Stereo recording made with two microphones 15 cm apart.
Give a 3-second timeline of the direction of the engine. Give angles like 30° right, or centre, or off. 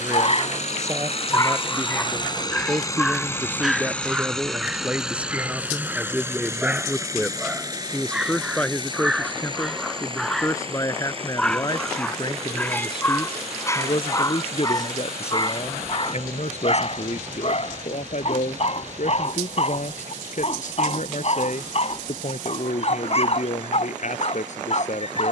40° left, centre, 20° right, 40° right, 40° right, 50° right, 50° right, 50° right, 60° right.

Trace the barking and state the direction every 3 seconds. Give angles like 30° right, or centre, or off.
20° left, 10° right, 10° right, centre, 20° left, 40° left, 50° left, 50° left, 50° left.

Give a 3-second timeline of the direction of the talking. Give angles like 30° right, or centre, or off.
20° right, 10° right, centre, 20° left, 40° left, 50° left, 60° left, 60° left, 60° left.